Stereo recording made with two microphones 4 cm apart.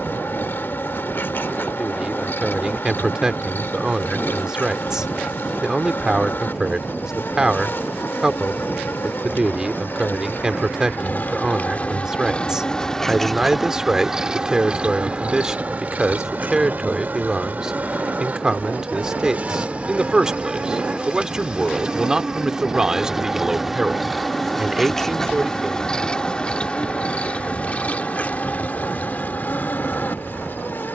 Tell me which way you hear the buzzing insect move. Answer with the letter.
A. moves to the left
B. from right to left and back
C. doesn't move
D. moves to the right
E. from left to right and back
E.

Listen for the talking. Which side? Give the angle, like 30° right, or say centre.
20° right.